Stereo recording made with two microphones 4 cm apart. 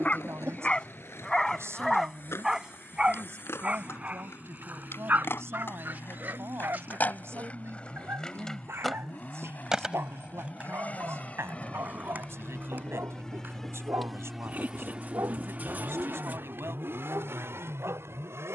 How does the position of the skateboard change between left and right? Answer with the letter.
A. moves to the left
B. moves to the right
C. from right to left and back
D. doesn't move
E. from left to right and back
B.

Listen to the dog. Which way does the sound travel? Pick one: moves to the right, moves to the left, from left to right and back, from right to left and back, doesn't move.
moves to the right.